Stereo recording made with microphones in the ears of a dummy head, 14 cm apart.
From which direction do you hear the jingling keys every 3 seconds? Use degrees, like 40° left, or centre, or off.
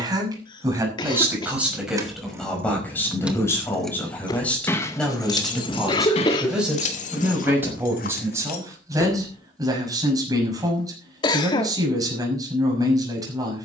20° right, 10° left, 50° left, off, off.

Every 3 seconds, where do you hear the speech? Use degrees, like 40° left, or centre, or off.
10° right, 10° left, 10° right, 20° right, 20° right.